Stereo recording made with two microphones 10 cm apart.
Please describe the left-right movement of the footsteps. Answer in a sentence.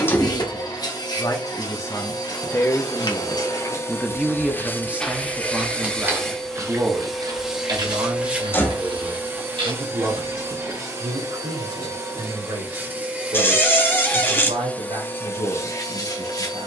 You can hear the footsteps go from the left side to the right.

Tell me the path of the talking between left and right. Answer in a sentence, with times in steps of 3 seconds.
You can hear the talking on the left from 0 s, in the centre from 3 s and on the right from 6 s.